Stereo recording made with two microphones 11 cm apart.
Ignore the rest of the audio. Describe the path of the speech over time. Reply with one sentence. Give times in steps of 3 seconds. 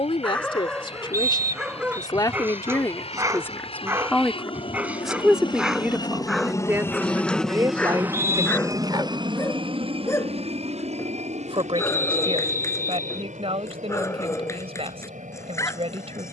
In this clip you hear the speech on the left from 0 s, in the centre from 3 s and on the right from 6 s.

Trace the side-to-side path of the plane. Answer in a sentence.
In this clip you hear the plane move from left to right.